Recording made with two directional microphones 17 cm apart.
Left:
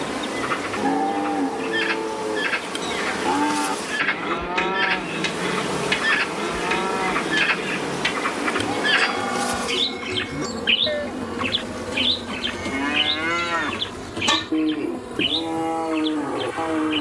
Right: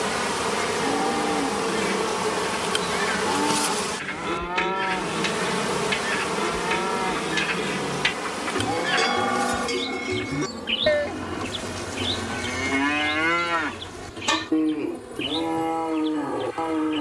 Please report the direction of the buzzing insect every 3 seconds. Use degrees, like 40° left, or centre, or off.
40° right, 10° right, 20° left, 40° left, 50° left, 60° left.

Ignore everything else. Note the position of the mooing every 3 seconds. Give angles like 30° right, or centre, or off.
40° left, 40° left, 30° left, centre, centre, 30° left.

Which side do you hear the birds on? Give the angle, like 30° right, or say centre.
70° left.